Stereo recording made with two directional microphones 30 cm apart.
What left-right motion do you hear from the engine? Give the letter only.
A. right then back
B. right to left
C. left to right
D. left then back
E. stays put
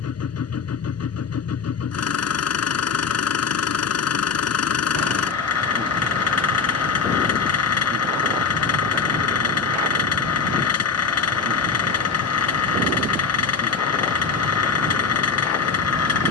E.